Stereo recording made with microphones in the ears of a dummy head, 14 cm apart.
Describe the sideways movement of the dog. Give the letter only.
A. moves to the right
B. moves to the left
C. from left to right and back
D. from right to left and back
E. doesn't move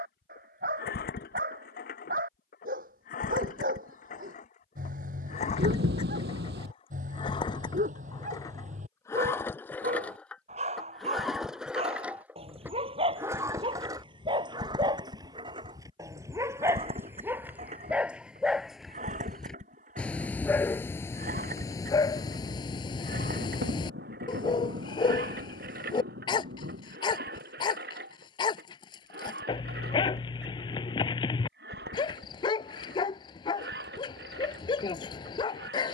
B.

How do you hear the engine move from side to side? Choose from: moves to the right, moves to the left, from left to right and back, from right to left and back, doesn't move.
moves to the right.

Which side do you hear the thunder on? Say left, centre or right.
right.